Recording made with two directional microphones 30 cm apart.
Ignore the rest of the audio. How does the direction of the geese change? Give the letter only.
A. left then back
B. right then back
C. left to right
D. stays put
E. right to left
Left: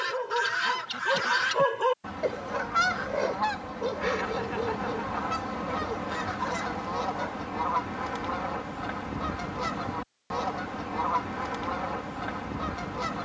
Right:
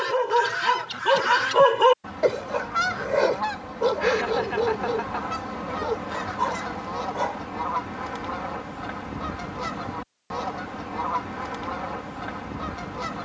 D.